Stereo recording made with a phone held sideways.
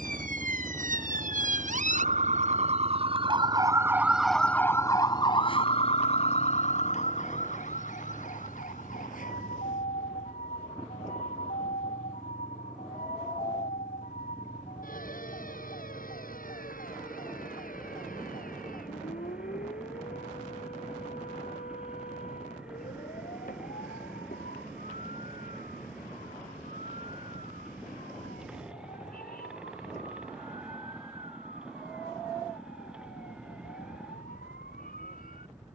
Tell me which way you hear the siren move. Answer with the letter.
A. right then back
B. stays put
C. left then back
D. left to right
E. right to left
E.